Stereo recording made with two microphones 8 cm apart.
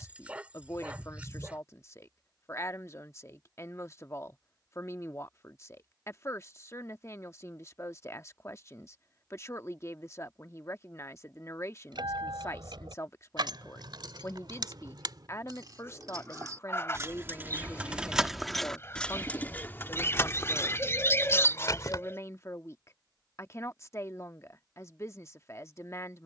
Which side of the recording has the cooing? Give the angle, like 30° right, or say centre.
30° left.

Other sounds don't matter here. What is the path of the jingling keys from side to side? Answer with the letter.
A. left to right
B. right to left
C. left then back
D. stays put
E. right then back
B.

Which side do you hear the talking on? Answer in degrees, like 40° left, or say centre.
40° left.